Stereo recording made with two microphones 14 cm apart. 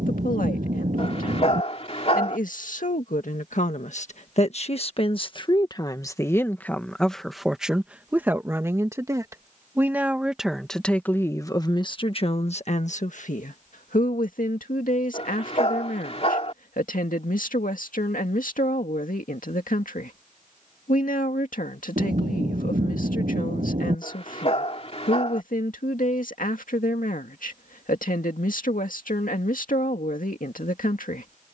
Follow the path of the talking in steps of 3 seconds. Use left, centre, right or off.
left, left, centre, centre, left, left, left, left, left, left, left.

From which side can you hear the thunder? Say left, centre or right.
right.